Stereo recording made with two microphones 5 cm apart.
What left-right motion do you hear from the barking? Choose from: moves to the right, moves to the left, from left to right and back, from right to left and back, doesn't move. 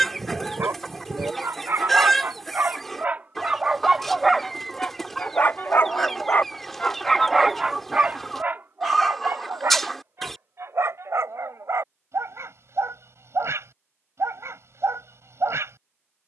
from right to left and back.